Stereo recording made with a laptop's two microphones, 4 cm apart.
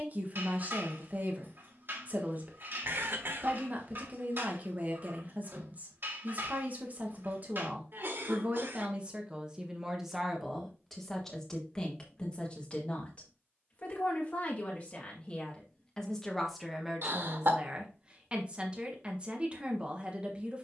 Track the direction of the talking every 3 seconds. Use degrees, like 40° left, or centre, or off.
40° right, 40° right, 40° right, centre, 30° left, centre, 30° right.